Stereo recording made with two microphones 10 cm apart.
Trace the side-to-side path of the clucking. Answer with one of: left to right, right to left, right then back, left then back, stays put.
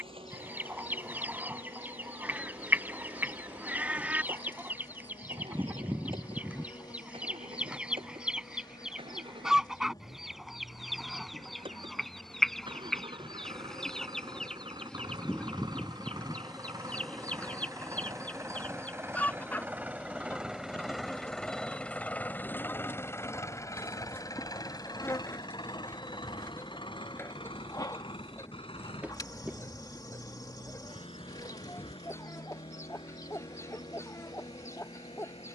right to left.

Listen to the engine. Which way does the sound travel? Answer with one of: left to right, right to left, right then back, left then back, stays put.
right to left.